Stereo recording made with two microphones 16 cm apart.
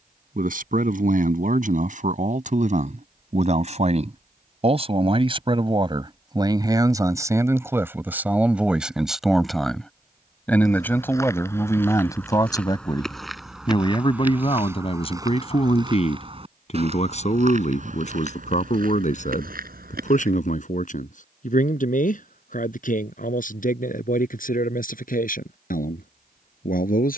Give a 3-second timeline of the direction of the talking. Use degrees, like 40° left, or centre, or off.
50° right, 40° right, 20° right, 10° left, 30° left, 40° left, 50° left, 60° left, 60° left.